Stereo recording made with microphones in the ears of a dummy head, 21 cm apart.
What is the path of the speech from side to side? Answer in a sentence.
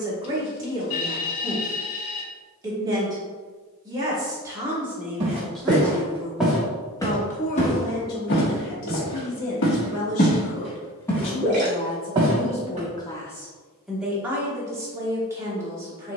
In this clip you hear the speech move from right to left and back again.